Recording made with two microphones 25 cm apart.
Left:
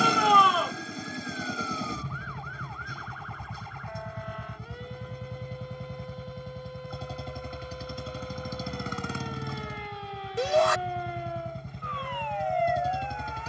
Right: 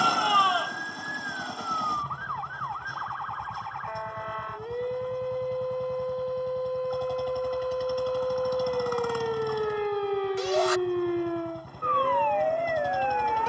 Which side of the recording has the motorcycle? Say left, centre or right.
left.